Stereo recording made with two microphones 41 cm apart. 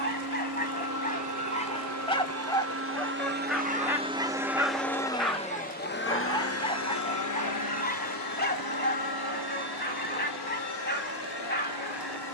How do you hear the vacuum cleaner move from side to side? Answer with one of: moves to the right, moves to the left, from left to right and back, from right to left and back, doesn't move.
moves to the left.